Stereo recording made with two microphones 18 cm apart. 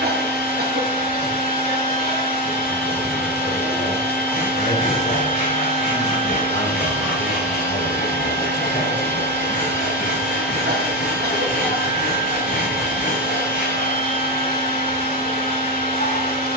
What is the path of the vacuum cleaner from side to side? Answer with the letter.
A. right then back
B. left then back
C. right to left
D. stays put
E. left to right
D.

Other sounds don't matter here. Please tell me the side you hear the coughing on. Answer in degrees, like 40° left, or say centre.
60° right.